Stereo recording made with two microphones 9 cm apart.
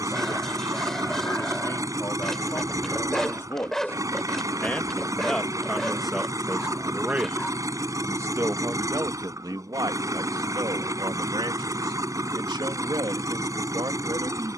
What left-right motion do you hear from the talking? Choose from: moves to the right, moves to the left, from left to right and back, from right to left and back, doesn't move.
moves to the right.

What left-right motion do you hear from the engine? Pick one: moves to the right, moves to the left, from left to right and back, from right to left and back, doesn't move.
doesn't move.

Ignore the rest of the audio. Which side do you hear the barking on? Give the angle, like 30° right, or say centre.
centre.